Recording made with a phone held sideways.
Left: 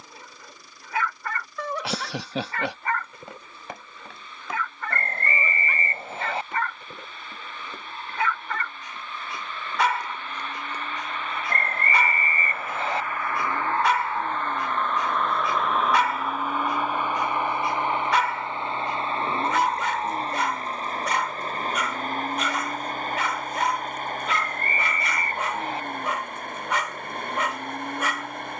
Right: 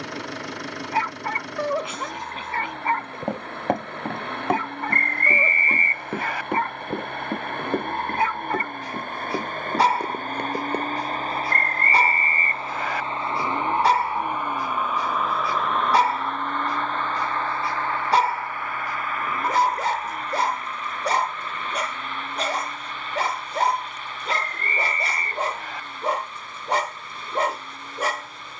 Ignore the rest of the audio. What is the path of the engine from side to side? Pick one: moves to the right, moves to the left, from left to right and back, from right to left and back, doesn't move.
moves to the left.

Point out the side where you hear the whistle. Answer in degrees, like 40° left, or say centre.
30° left.